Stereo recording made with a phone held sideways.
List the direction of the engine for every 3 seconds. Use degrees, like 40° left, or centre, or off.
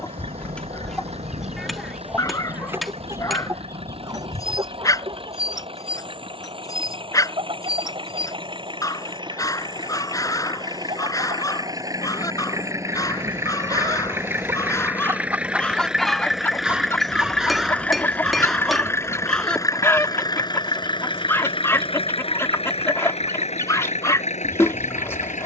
50° right, 50° right, 40° right, 30° right, 20° right, centre, 20° left, 50° left, 60° left.